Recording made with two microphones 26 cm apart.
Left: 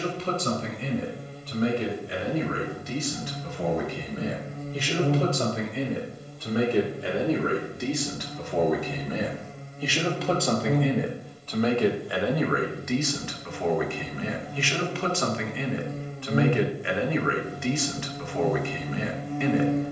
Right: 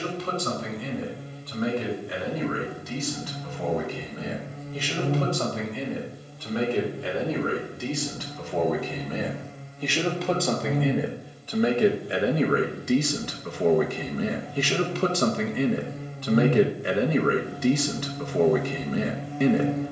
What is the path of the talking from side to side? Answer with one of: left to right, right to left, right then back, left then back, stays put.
left to right.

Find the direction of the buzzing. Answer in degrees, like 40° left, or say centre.
50° left.